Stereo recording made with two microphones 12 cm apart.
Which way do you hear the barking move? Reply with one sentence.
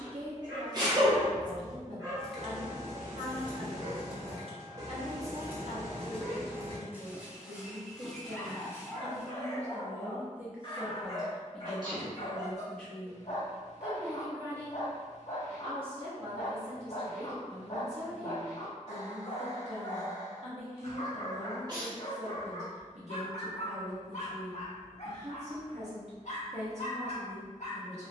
You can hear the barking move from right to left.